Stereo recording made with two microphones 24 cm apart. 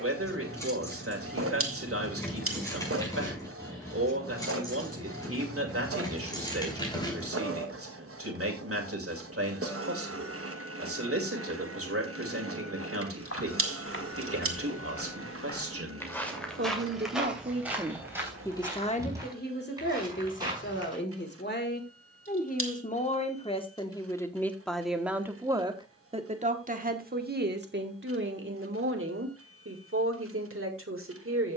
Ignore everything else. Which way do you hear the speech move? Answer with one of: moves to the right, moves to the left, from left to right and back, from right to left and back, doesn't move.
from right to left and back.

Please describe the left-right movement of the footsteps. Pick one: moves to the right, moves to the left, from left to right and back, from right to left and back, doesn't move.
moves to the right.